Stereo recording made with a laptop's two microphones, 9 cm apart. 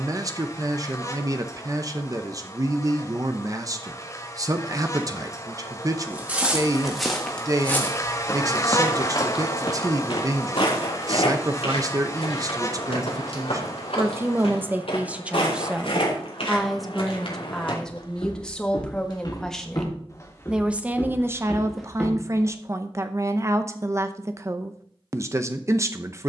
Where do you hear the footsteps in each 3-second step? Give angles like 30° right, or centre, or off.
off, off, 10° left, 60° left, 80° left, 70° left, 40° left, centre, off.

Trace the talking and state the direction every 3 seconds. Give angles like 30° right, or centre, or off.
40° right, 40° right, 40° right, 40° right, 30° right, centre, centre, 30° right, 30° right.